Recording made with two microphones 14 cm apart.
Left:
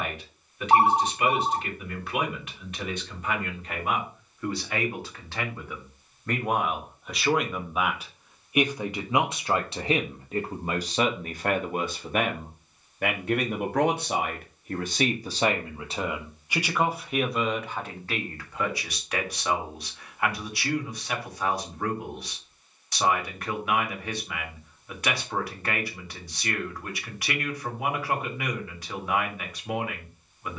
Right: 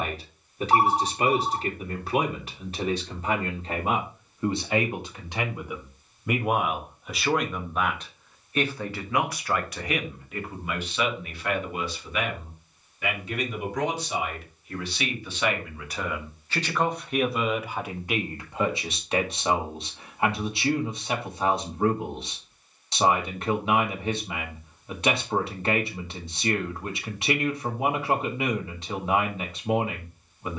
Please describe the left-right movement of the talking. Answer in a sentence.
You can hear the talking move from right to left and back again.